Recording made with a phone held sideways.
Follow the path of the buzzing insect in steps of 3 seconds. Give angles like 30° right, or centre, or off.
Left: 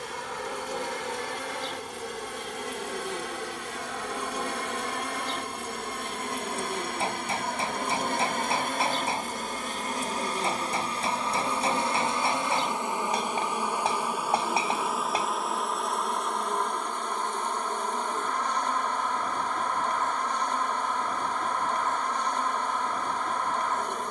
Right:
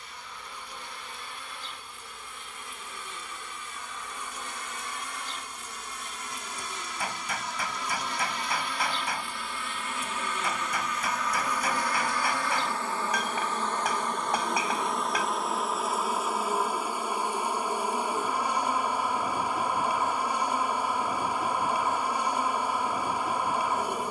70° left, 70° left, 50° left, 30° left, 10° left, 10° right, 10° right, 10° right.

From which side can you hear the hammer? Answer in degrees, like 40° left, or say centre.
30° left.